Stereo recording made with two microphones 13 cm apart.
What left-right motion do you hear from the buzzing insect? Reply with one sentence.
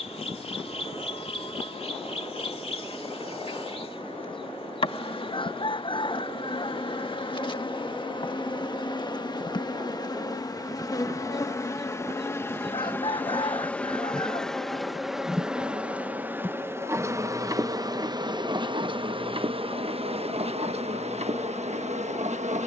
You can hear the buzzing insect move to the right.